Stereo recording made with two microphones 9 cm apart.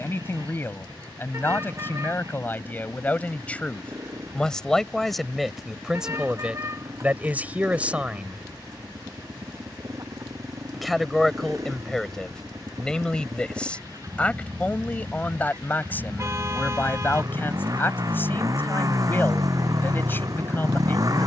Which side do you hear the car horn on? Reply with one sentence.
You can hear the car horn on the right.